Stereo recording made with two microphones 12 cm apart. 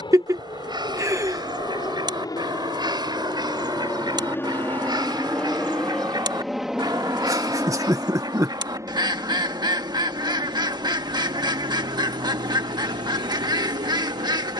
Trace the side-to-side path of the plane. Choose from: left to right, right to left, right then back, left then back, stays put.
left to right.